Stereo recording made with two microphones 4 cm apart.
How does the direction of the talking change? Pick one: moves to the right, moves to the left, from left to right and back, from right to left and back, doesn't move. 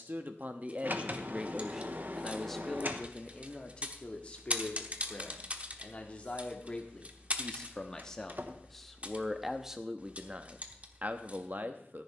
from right to left and back.